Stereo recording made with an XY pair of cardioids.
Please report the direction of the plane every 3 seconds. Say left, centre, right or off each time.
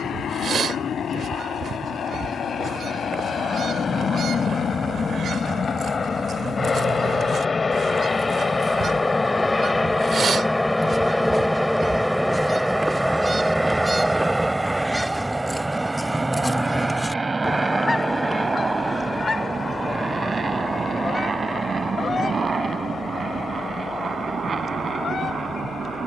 left, left, left, centre, centre, right, right, right, right.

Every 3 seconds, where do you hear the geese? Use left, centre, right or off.
right, right, right, right, right, centre, left, left, left.